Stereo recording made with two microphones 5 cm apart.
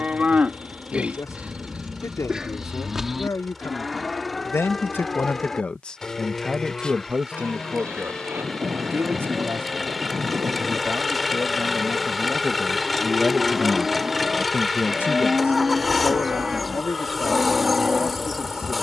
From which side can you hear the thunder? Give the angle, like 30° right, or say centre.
50° right.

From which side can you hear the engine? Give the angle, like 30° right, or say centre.
centre.